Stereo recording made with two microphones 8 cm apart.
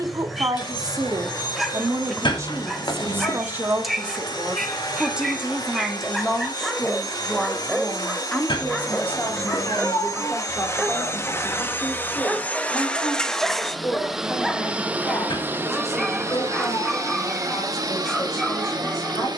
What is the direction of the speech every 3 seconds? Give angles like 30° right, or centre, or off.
40° right, 20° right, 10° left, 30° left, 40° left, 50° left, 50° left.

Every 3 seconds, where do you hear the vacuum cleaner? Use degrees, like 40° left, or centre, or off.
70° left, 60° left, 60° left, 40° left, centre, 40° right, 60° right.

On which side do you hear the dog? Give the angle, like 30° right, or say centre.
centre.